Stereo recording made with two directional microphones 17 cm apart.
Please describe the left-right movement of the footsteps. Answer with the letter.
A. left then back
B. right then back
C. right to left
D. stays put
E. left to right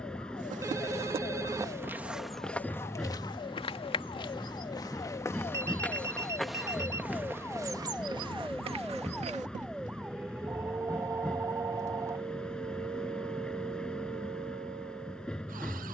A.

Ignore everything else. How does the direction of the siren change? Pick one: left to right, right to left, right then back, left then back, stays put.
left to right.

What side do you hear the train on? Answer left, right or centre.
centre.